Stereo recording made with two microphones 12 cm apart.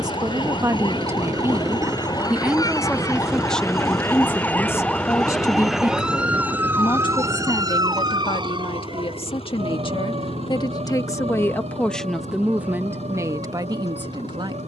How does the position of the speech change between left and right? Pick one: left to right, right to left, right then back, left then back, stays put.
left then back.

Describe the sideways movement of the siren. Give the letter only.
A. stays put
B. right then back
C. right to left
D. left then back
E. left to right
E.